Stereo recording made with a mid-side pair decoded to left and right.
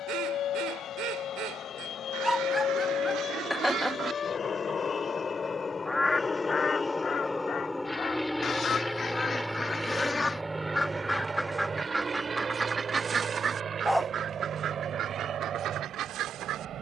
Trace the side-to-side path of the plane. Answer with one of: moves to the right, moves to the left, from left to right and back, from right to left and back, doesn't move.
moves to the right.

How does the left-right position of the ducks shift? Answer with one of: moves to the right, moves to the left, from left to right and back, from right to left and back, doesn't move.
from right to left and back.